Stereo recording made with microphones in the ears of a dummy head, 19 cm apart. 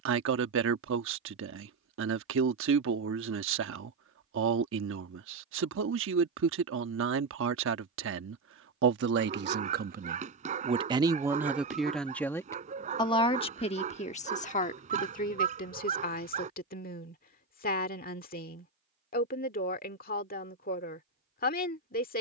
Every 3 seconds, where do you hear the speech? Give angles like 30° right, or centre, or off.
70° right, 70° right, 70° right, 30° right, 30° left, 40° left, 50° left, 50° left.